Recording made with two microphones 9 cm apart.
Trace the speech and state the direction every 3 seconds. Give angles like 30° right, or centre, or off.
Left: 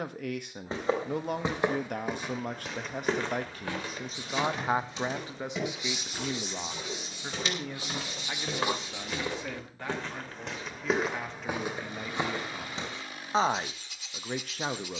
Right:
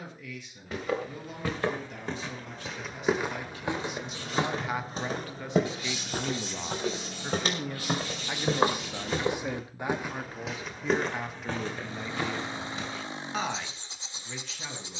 60° left, 30° left, centre, 10° right, 40° left.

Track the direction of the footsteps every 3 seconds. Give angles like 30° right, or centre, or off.
20° left, 40° right, 50° right, centre, 30° left.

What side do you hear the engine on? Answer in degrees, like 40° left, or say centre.
30° right.